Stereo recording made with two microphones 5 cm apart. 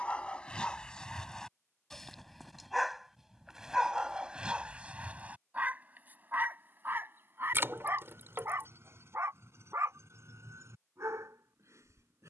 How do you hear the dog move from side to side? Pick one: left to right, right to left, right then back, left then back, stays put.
left to right.